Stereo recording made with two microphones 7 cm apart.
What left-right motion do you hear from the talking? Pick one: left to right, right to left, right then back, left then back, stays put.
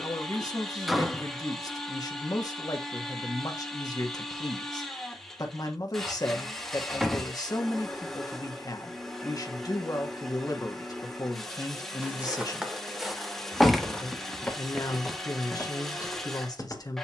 stays put.